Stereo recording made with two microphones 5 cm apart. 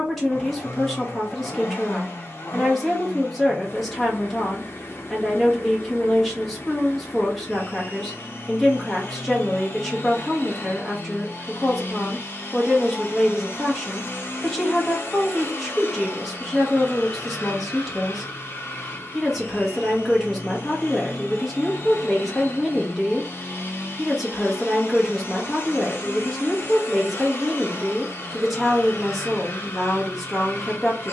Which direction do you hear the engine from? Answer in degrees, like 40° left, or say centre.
50° left.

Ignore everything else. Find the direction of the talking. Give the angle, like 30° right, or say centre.
centre.